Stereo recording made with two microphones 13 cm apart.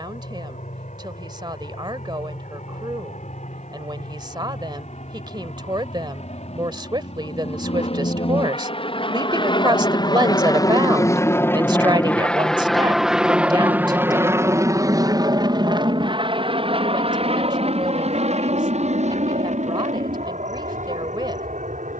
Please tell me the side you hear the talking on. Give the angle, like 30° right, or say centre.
30° right.